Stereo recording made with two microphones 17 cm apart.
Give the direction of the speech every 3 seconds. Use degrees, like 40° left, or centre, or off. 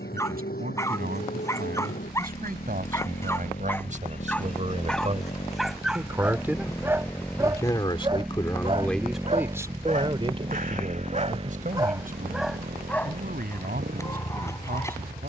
60° right, 40° right, 10° left, 30° right, 60° right.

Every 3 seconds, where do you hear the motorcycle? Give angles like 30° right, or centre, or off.
60° left, 40° left, 10° left, 30° right, 50° right.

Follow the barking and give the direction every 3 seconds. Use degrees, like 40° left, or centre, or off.
20° left, 10° left, 20° right, 40° right, 10° left.